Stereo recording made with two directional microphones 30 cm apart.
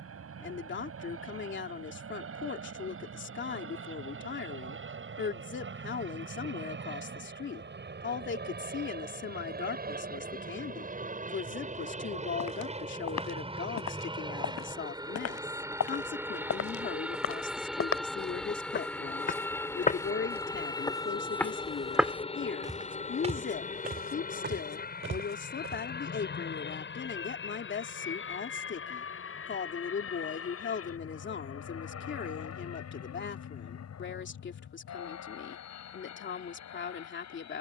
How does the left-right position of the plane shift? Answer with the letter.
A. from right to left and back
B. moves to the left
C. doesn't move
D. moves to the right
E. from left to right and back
B.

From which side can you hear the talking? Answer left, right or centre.
left.